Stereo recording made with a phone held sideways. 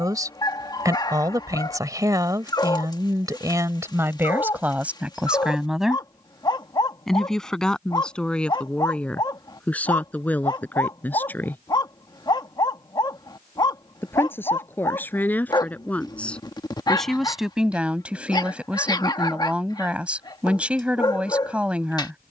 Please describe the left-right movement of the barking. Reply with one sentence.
You can hear the barking stay in one place.